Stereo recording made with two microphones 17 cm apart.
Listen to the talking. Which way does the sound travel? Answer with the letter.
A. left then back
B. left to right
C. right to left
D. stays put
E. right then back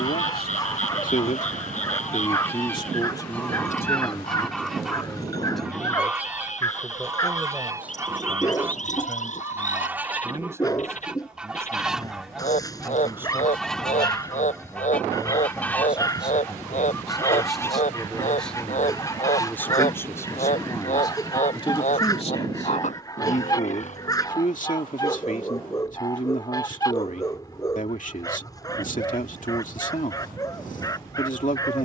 E.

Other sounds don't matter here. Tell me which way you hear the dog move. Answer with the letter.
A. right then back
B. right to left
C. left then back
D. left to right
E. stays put
E.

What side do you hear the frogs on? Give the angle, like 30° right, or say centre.
50° left.